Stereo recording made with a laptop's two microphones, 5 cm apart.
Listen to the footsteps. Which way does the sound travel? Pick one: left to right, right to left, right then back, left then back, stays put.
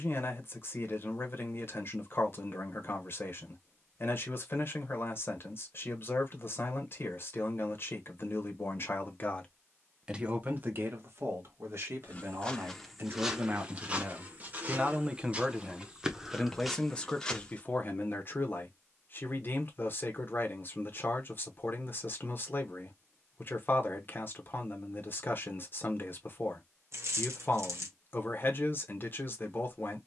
right then back.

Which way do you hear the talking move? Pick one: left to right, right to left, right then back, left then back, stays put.
right then back.